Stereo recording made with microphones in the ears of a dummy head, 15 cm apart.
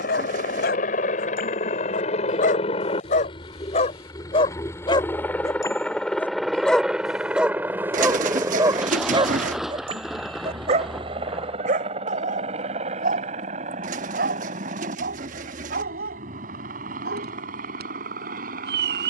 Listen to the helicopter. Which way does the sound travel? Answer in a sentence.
You can hear the helicopter go from the left side to the right.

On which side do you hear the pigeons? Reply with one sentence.
In this clip you hear the pigeons on the right.